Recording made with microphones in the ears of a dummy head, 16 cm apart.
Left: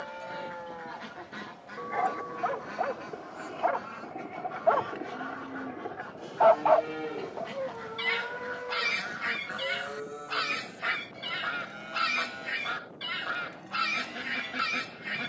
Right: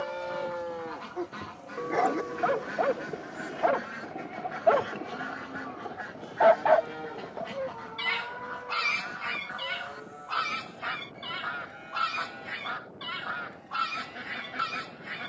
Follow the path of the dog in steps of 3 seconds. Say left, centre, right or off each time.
right, right, centre, left, left.